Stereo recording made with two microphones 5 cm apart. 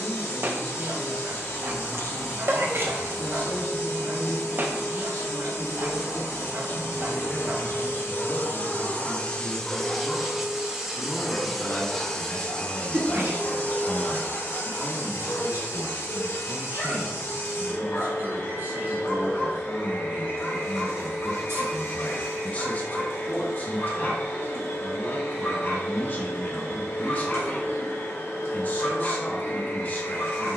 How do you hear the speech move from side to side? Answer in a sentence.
In this clip you hear the speech go right and come back.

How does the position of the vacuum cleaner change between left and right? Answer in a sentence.
You can hear the vacuum cleaner go right and come back.